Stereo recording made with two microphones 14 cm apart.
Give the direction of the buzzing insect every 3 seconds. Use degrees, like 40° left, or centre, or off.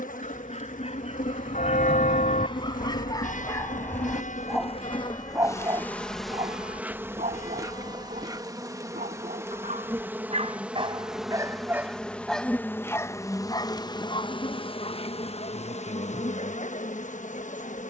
70° left, 40° left, 20° right, 10° right, 20° left, 50° left.